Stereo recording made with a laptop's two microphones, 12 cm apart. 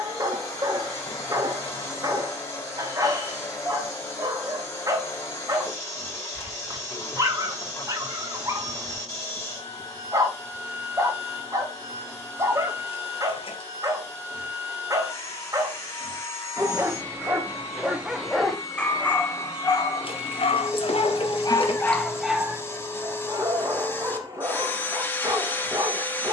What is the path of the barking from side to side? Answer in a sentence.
In this clip you hear the barking go left and come back.